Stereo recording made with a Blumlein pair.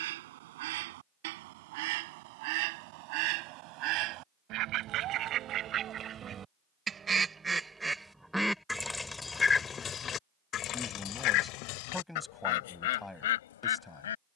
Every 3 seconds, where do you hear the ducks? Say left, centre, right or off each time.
right, right, centre, left, left.